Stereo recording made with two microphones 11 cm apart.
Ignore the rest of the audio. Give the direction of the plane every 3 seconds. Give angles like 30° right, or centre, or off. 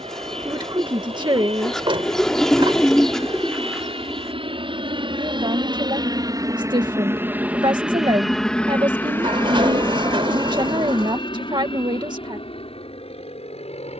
70° right, 60° right, 10° right, 30° left, 50° left.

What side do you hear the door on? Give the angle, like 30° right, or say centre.
50° right.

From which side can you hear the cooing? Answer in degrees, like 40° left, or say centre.
centre.